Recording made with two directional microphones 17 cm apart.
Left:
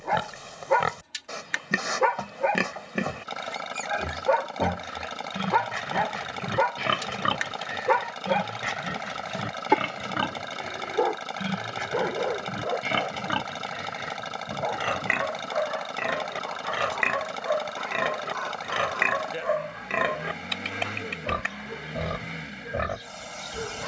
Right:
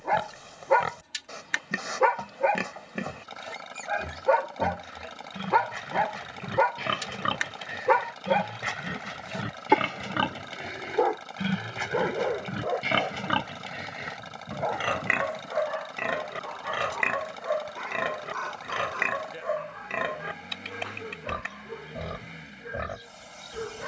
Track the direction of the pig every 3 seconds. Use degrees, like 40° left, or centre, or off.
30° left, 30° left, 20° left, 10° right, 10° right, 10° left, 20° left, 30° left.